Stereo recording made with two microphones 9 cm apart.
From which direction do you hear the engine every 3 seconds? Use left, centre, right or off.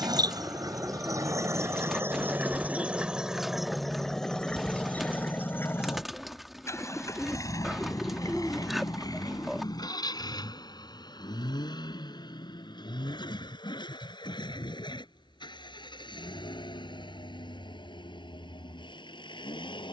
right, centre, left, left, left, left, left.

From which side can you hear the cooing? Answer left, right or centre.
centre.